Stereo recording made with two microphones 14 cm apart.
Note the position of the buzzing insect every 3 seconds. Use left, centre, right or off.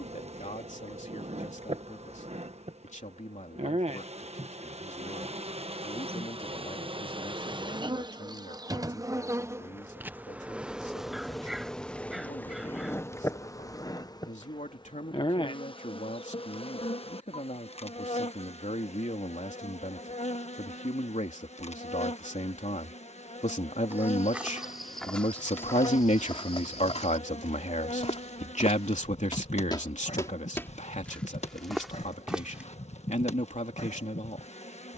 right, right, right, centre, left, left, left, left, left, left, left, left.